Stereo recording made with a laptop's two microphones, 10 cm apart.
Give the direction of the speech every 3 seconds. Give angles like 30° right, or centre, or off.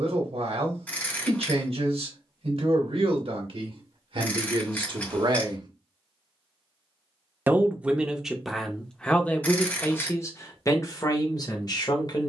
70° right, 60° right, 10° right, 30° left.